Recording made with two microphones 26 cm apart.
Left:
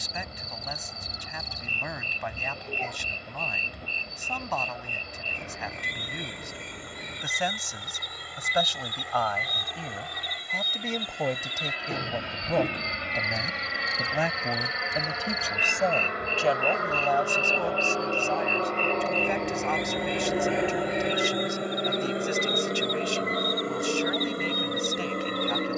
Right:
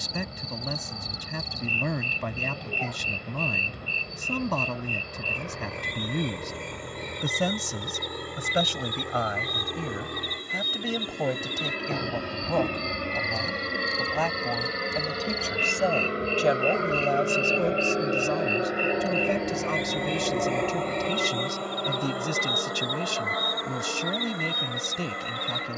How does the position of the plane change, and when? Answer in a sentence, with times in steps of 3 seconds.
You can hear the plane on the right from 0 s, in the centre from 18 s and on the left from 21 s.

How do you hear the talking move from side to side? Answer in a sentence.
In this clip you hear the talking move from right to left and back again.